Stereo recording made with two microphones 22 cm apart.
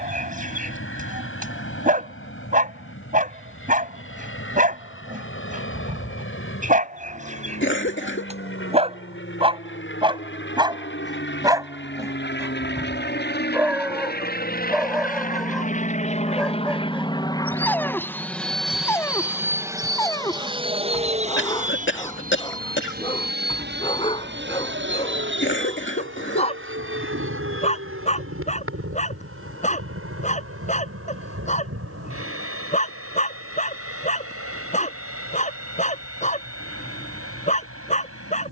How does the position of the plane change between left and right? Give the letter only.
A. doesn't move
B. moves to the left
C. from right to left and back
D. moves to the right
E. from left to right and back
D.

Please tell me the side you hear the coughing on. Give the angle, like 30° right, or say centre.
60° left.